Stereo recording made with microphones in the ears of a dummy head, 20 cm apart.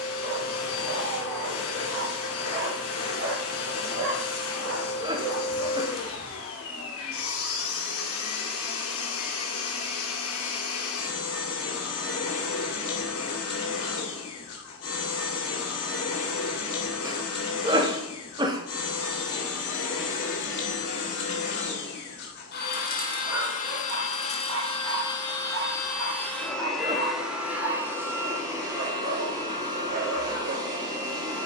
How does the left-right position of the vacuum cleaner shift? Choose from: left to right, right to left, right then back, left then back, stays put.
left to right.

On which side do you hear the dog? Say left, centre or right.
right.